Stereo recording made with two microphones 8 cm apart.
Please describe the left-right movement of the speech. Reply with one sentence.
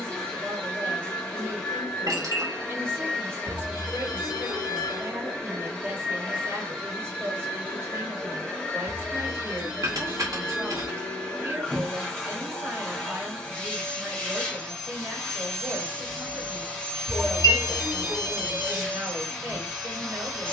You can hear the speech stay put.